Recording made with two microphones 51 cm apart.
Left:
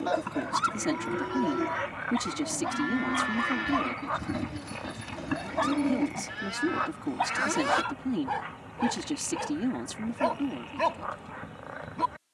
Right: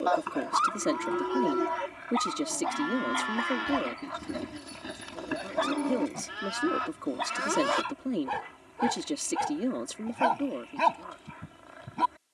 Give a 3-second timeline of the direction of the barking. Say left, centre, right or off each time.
left, left, centre, centre.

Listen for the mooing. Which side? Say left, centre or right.
left.